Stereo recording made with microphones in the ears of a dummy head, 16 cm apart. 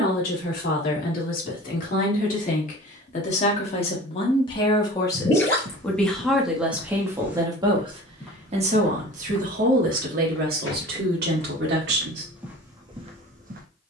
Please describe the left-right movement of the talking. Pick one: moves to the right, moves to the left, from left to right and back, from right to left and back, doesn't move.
moves to the right.